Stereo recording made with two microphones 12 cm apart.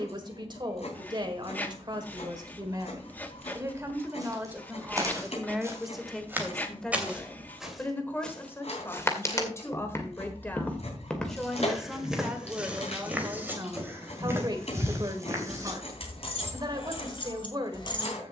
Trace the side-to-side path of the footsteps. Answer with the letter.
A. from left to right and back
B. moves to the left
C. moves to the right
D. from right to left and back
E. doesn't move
D.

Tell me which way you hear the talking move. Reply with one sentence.
You can hear the talking move from right to left and back again.